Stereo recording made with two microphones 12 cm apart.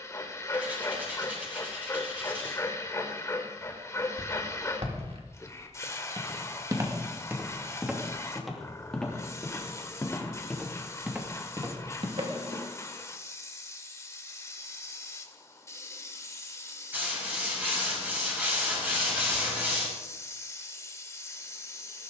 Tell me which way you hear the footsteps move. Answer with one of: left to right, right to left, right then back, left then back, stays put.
left then back.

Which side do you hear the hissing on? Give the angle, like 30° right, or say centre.
20° left.